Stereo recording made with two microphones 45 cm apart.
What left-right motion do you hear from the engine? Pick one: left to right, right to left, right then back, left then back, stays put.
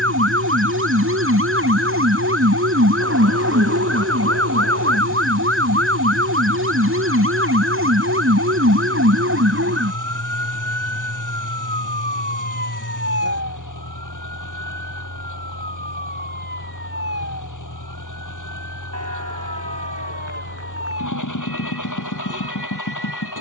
stays put.